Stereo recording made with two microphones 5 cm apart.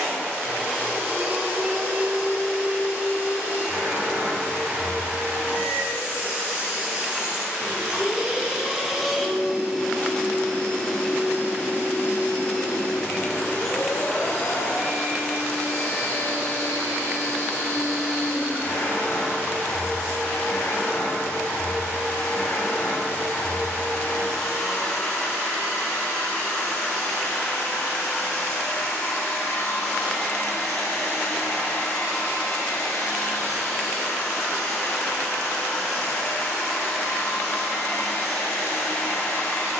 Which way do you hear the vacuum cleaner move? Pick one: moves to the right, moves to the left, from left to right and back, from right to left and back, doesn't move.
moves to the left.